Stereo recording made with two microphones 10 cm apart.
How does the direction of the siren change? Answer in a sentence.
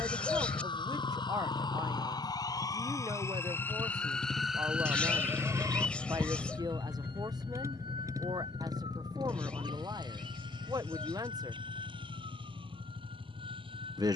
In this clip you hear the siren go from the left side to the right.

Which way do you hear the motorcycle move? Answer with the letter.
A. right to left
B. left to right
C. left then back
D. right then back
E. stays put
B.